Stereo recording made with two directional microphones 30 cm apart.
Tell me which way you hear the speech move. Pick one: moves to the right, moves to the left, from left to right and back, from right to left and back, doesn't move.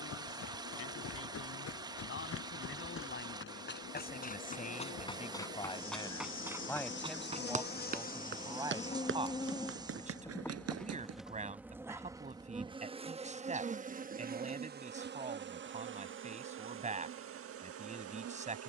moves to the right.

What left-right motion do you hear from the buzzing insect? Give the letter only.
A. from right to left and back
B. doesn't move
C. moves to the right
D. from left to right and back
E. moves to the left
C.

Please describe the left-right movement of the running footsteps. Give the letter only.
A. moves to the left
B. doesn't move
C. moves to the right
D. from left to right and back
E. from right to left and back
C.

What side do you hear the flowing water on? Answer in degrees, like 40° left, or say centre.
10° right.